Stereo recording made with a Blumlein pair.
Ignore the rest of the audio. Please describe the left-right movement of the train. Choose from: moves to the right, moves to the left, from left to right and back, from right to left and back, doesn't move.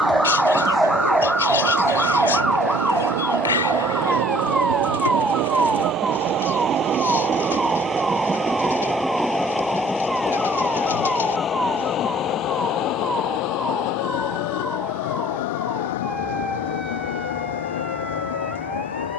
moves to the left.